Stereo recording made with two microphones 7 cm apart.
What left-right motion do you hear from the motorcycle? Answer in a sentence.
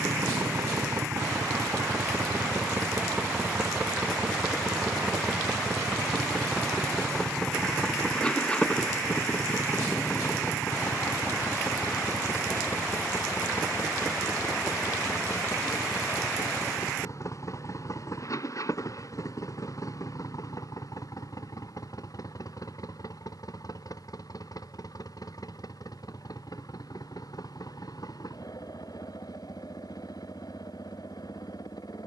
In this clip you hear the motorcycle move from right to left.